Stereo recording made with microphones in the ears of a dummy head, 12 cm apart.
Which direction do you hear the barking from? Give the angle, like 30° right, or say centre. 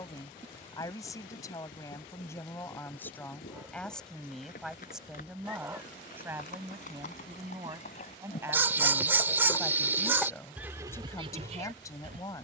20° right.